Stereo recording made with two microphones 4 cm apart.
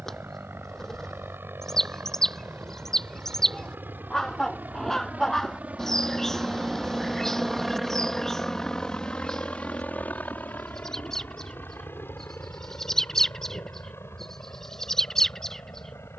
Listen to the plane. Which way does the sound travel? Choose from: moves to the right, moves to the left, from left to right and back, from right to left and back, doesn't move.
moves to the left.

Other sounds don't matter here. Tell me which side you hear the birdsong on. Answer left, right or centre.
centre.